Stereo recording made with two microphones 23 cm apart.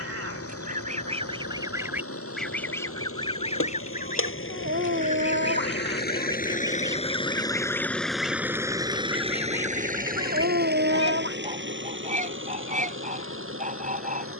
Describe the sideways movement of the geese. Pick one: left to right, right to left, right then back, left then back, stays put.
left then back.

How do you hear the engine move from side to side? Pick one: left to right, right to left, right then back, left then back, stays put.
left to right.